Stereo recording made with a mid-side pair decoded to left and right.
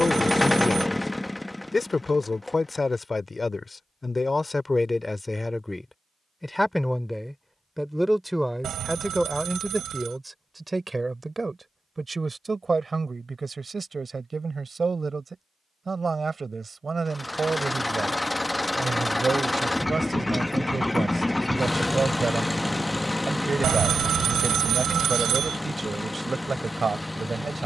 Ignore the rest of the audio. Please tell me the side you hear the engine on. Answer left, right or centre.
centre.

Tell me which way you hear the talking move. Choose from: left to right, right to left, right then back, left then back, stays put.
left to right.